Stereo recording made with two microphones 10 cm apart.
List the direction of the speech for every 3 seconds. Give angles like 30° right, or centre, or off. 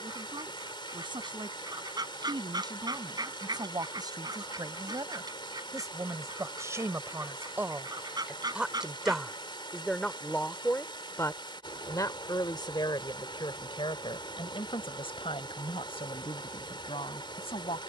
50° right, 40° right, 20° right, 20° left, 60° left, 70° left.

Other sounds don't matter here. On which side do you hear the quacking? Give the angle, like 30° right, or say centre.
40° right.